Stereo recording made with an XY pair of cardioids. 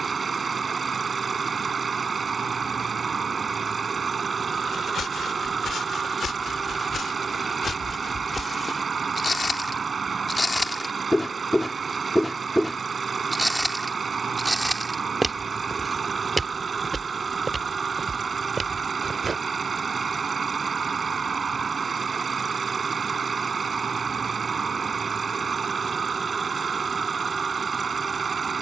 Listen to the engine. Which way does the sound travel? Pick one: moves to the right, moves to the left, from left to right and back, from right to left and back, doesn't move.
doesn't move.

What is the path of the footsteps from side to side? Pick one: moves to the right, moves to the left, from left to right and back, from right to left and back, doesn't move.
moves to the right.